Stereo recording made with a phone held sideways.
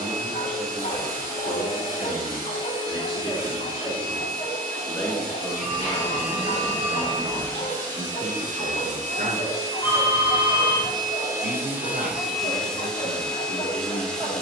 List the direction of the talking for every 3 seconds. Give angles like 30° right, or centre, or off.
30° left, 10° left, 30° right, 60° right, 60° right.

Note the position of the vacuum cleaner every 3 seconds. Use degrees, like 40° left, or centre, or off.
70° right, 70° right, 60° right, 30° right, centre.